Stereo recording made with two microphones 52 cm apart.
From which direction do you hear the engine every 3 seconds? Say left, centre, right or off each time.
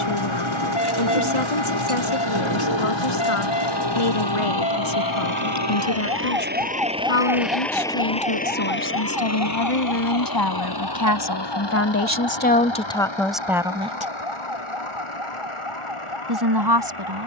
right, right, centre, left, left, left.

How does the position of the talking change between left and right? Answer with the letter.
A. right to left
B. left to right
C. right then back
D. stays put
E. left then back
B.